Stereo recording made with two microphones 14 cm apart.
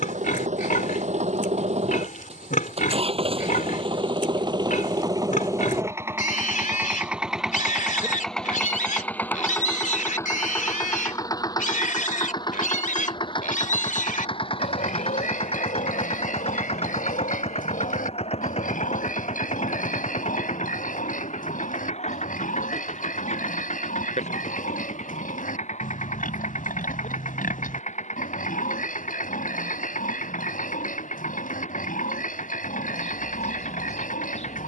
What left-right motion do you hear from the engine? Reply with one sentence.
In this clip you hear the engine move to the left.